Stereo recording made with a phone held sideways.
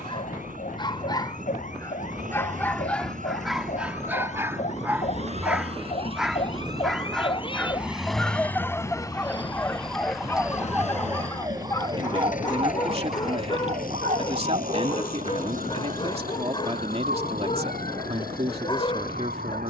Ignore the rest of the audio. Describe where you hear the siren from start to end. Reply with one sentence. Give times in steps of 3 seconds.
In this clip you hear the siren on the left from 0 s, in the centre from 9 s and on the right from 12 s.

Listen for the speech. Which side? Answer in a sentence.
In this clip you hear the speech on the right.